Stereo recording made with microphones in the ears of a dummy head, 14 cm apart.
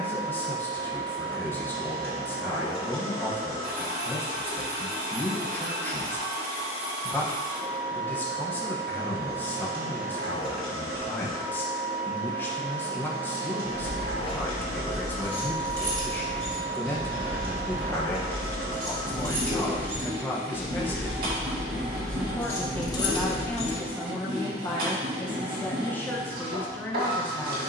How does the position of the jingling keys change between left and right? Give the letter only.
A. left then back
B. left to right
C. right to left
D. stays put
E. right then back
E.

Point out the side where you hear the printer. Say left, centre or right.
right.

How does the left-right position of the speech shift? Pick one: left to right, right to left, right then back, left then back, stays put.
stays put.